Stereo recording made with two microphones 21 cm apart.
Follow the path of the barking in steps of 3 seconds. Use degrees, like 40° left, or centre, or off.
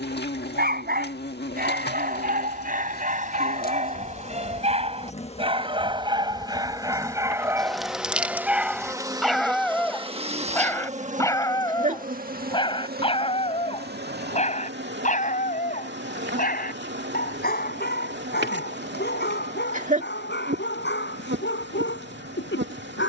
40° right, 30° right, 10° right, 10° left, 30° left, 40° left, 50° left, 60° left.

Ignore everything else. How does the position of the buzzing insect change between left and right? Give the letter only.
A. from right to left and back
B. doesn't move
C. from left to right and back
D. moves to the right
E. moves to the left
D.